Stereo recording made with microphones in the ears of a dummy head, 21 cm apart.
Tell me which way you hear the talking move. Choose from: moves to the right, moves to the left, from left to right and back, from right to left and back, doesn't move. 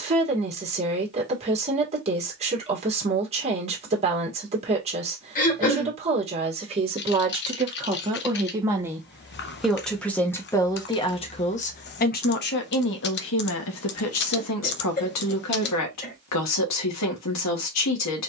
moves to the left.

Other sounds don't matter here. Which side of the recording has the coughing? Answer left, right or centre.
left.